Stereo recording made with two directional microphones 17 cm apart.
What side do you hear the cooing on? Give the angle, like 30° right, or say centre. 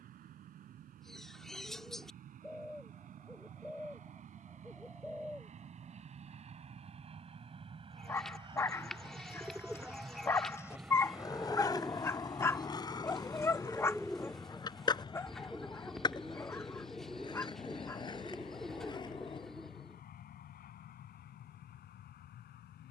centre.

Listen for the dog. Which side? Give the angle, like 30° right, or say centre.
20° left.